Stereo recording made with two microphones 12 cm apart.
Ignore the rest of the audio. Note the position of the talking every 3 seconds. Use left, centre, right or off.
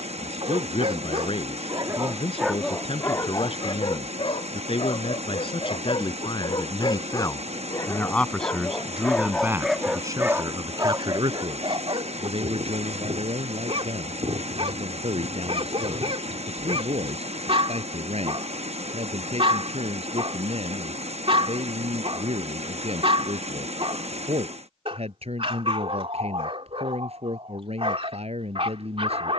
left, left, left, right, right, right, right, right, right, right.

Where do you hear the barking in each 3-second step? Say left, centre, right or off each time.
right, left, left, right, right, right, right, right, right, right.